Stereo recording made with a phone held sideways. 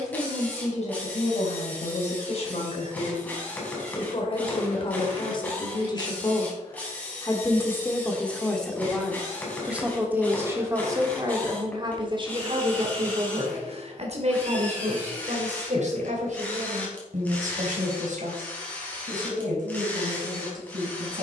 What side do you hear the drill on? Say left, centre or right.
centre.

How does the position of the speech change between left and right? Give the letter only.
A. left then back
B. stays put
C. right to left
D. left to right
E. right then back
D.